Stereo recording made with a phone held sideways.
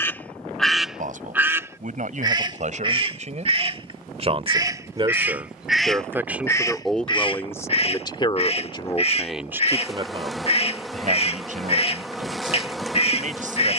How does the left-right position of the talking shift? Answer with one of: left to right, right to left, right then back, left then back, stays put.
left then back.